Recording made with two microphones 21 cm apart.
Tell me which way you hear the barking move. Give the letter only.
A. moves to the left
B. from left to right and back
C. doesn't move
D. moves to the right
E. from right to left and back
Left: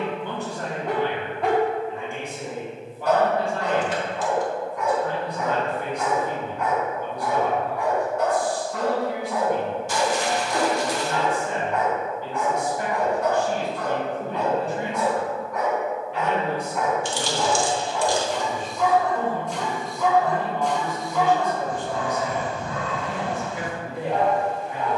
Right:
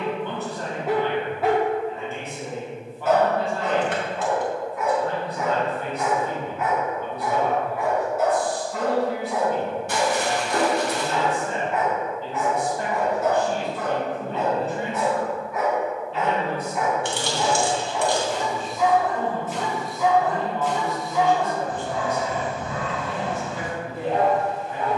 C.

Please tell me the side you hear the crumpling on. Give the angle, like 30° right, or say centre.
60° right.